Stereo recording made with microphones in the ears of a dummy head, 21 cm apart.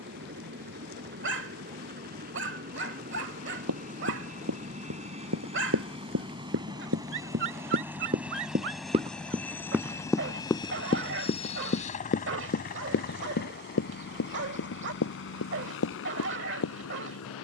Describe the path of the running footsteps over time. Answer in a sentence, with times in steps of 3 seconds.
In this clip you hear the running footsteps not at all from 0 s, on the right from 3 s, in the centre from 9 s and on the left from 12 s.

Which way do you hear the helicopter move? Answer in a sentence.
You can hear the helicopter travel towards the left.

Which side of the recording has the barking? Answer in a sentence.
In this clip you hear the barking on the right.